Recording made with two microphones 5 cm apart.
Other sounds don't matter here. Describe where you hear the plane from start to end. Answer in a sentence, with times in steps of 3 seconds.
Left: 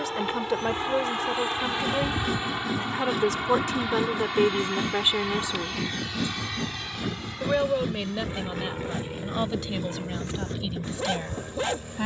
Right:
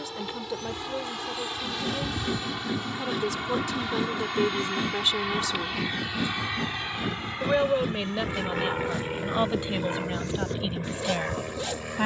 In this clip you hear the plane on the left from 0 s, in the centre from 3 s and on the right from 6 s.